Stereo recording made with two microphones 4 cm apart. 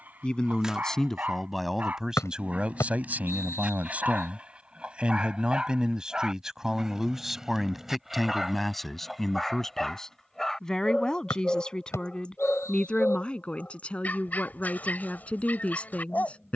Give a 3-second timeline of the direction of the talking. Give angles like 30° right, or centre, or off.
centre, 30° right, centre, 10° left, 20° left, 30° left.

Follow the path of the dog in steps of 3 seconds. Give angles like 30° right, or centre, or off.
30° right, 20° right, 10° right, 10° left, 30° left, 30° left.